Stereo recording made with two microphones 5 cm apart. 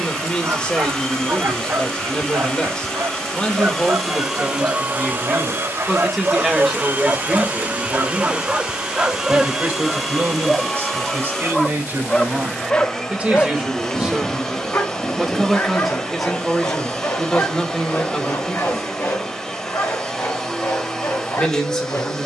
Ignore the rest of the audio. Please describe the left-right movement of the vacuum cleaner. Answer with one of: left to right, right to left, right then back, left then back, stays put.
right then back.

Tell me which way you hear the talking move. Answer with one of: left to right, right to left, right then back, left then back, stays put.
right then back.